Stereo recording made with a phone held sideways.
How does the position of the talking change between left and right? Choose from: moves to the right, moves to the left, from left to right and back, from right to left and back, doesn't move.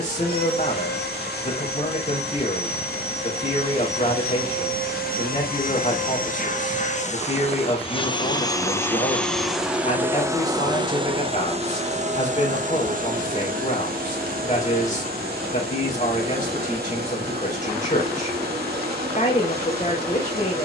doesn't move.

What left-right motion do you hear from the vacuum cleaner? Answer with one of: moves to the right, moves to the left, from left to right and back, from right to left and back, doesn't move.
moves to the right.